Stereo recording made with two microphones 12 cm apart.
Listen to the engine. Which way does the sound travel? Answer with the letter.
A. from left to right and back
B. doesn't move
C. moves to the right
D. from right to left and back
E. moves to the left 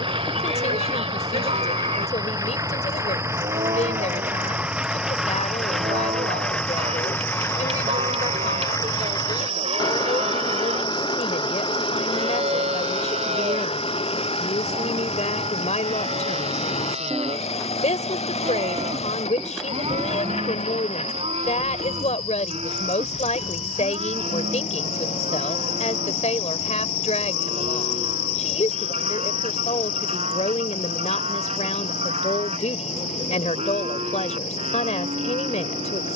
E.